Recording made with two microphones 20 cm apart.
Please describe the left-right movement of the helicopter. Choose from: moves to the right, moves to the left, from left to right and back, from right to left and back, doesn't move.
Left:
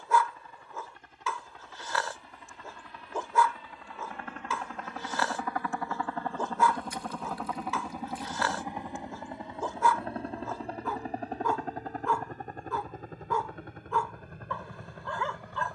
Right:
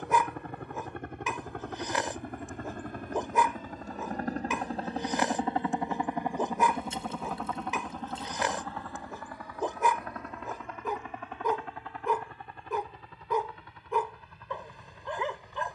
moves to the left.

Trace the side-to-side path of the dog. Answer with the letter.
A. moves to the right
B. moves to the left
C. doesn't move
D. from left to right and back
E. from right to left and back
C.